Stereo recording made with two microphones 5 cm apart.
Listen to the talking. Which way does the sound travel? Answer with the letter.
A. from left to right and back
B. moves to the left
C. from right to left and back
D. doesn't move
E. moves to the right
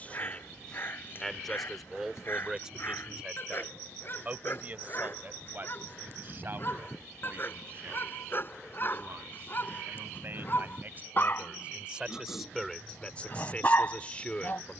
A.